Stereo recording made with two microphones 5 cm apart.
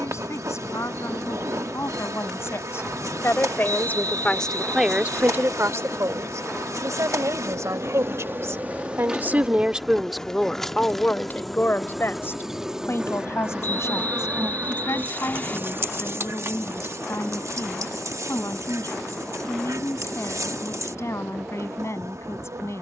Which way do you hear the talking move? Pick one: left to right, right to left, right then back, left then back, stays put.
right then back.